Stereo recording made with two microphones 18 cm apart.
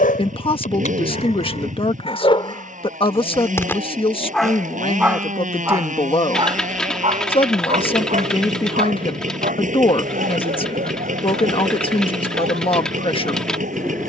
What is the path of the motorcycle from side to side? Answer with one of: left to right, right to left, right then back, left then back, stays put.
stays put.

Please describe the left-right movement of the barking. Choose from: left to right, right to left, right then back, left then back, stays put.
left to right.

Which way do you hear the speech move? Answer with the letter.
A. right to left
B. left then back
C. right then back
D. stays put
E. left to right
D.